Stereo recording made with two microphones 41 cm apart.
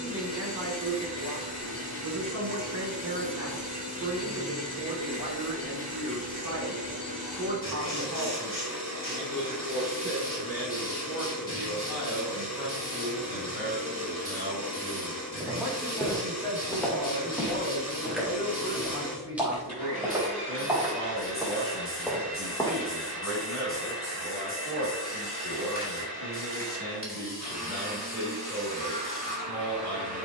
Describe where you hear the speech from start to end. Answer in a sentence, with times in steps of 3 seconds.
You can hear the speech on the right from 0 s, in the centre from 15 s and on the left from 18 s.